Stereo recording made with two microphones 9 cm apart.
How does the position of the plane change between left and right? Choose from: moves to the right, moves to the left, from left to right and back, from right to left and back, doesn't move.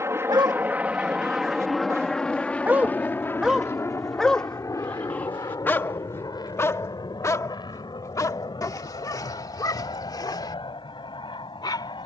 moves to the left.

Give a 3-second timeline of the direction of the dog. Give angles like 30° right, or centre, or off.
30° right, 10° left, 40° left, 50° left.